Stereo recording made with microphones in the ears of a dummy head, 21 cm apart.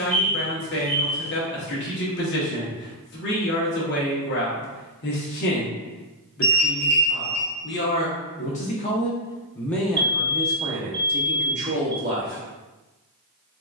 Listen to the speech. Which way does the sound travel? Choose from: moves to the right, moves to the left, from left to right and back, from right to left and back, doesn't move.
moves to the right.